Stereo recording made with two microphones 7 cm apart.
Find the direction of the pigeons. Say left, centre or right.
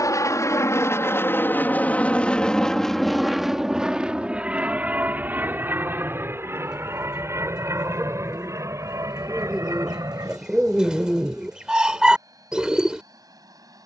centre.